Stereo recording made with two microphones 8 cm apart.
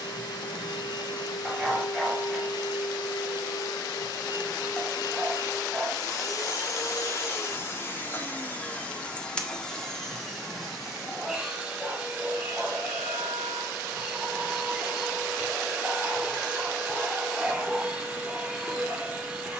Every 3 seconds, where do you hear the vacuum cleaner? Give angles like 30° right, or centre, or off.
80° left, 60° left, 30° left, centre, 10° right, 10° right, 10° right.